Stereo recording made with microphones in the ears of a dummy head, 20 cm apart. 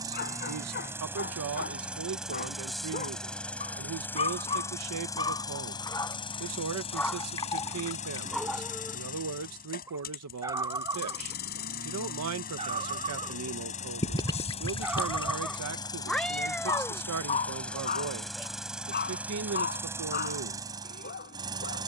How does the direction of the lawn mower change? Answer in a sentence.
You can hear the lawn mower move from right to left and back again.